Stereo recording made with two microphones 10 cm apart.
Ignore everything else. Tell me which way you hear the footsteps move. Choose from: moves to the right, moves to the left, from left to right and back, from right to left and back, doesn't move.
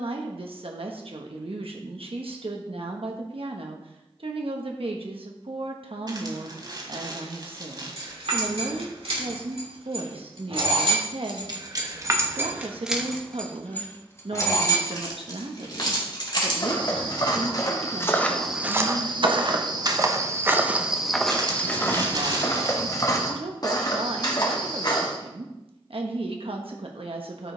from left to right and back.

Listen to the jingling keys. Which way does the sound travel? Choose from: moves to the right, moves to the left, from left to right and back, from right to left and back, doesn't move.
moves to the left.